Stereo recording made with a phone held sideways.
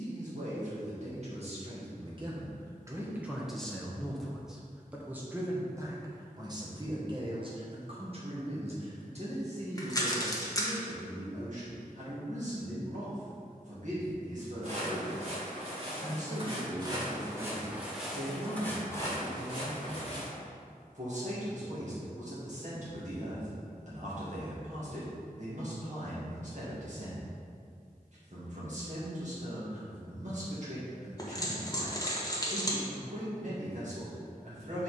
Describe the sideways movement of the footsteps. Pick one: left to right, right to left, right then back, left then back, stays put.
right to left.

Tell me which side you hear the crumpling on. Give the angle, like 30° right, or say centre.
20° left.